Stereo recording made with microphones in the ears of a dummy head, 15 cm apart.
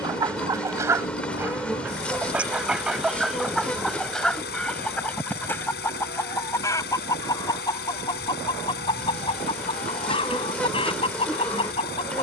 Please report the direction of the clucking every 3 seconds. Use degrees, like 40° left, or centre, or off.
10° right, 10° left, 20° left, 30° left.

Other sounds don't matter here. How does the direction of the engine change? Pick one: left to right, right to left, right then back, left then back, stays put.
stays put.